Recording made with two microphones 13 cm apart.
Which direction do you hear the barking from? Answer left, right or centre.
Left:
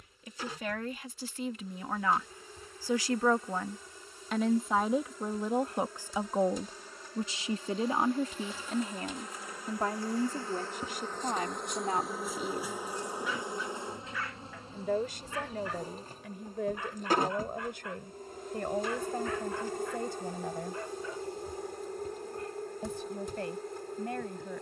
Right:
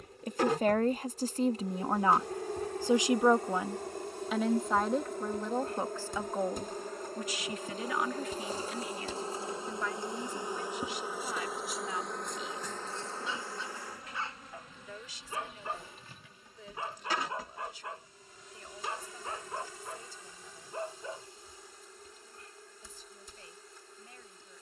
right.